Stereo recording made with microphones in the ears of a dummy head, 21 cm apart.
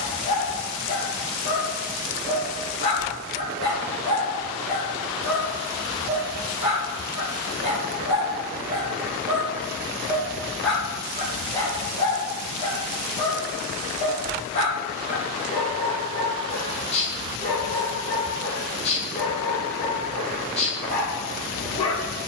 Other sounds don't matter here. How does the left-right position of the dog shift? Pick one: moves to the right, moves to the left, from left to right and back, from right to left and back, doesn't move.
from left to right and back.